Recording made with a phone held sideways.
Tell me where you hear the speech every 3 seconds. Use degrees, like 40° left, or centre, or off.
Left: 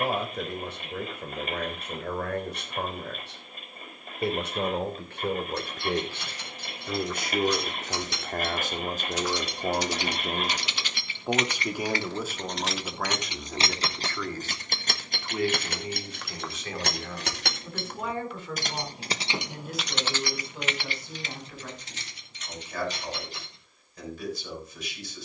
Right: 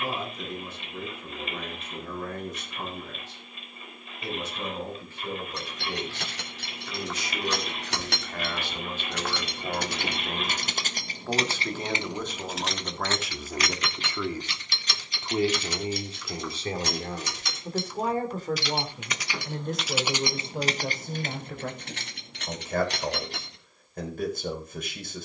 70° left, 60° left, 50° left, 30° left, centre, 30° right, 50° right, 50° right, 50° right.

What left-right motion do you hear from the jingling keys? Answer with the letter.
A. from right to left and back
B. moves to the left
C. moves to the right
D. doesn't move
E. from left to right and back
A.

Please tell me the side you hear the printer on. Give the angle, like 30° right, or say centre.
50° left.